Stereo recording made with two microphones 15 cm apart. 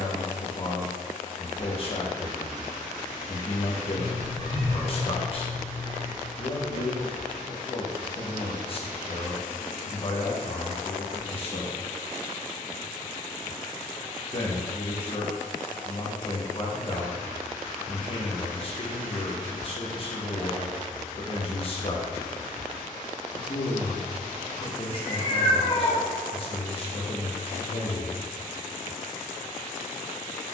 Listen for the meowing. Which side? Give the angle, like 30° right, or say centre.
40° left.